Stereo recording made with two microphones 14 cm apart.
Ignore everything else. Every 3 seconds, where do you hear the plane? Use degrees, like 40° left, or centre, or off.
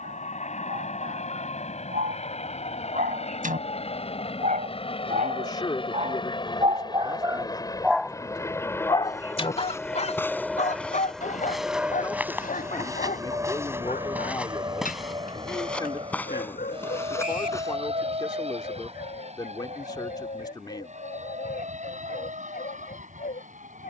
60° left, 50° left, 30° left, centre, 20° right, 40° right, 50° right, 50° right.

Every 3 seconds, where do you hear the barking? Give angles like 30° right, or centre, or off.
80° right, 70° right, 20° right, 60° left, 70° left, 80° left, 80° left, 80° left.